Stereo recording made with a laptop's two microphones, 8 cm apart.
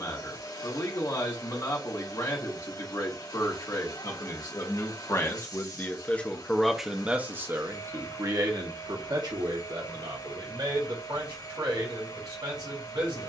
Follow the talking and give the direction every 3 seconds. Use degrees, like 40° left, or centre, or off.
60° left, 50° left, 20° right, 70° right, 80° right.